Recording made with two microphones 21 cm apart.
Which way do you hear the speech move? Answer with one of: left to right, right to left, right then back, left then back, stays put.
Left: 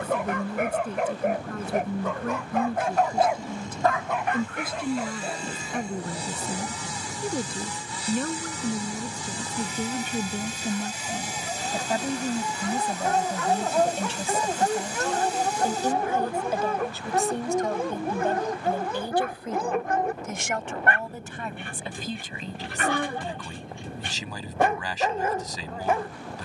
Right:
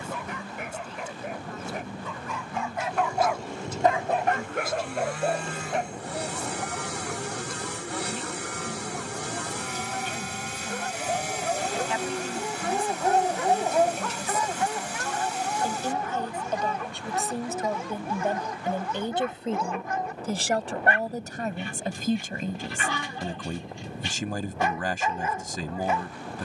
left to right.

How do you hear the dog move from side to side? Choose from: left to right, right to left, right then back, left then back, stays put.
right then back.